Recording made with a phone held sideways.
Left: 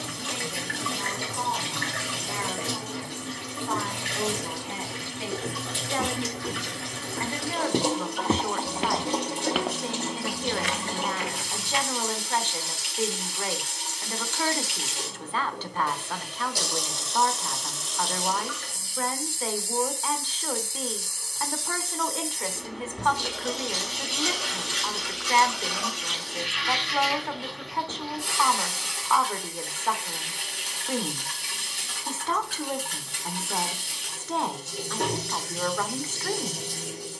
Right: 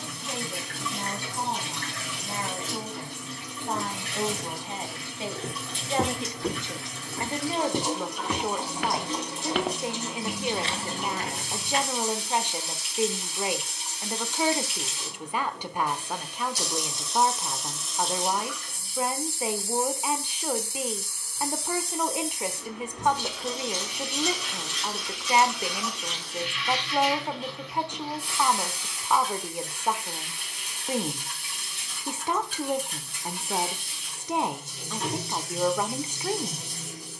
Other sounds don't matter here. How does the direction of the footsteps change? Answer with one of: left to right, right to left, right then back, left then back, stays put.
left then back.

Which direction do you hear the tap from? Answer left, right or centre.
left.